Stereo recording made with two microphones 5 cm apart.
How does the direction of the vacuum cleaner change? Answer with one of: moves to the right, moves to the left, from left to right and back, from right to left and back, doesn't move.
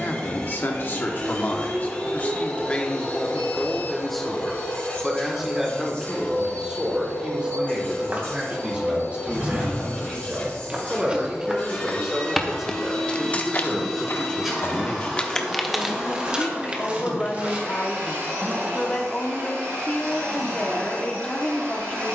moves to the right.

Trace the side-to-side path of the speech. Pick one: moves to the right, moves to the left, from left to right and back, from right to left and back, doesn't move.
from left to right and back.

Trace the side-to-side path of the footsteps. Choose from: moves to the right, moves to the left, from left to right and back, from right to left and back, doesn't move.
from right to left and back.